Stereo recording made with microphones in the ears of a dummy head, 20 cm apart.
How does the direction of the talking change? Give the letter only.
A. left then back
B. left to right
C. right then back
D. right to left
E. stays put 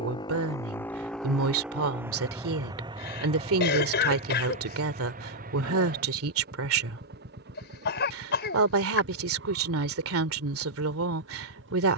E.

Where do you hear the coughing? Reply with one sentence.
In this clip you hear the coughing on the left.